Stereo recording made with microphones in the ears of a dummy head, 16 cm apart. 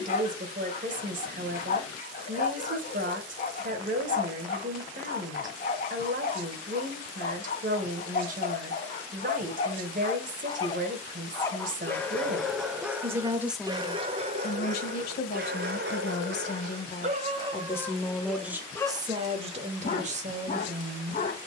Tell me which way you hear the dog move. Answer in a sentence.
In this clip you hear the dog move from left to right and back again.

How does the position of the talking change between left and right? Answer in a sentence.
You can hear the talking go left and come back.